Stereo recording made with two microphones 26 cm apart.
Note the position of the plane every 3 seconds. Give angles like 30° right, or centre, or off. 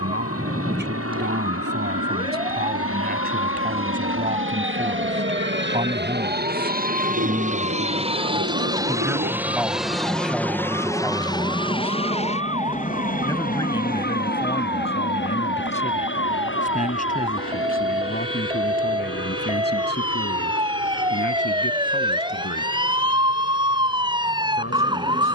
70° right, 50° right, 30° right, 10° left, 30° left, 50° left, 50° left, 60° left, 60° left.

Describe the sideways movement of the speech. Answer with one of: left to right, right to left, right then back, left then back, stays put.
right to left.